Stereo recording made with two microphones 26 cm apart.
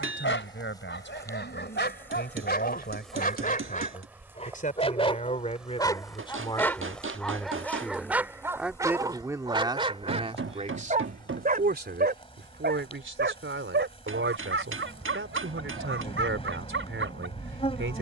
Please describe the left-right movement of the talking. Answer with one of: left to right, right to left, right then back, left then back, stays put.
left to right.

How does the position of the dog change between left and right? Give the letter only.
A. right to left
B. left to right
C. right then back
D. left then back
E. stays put
B.